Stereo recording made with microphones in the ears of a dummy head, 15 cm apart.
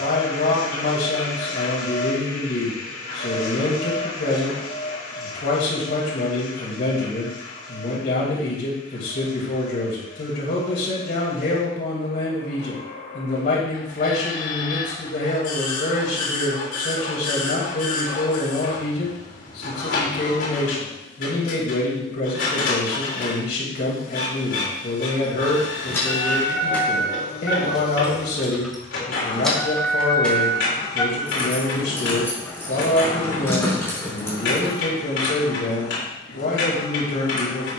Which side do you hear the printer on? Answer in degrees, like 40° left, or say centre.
80° left.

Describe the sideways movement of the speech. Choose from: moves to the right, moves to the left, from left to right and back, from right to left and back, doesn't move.
doesn't move.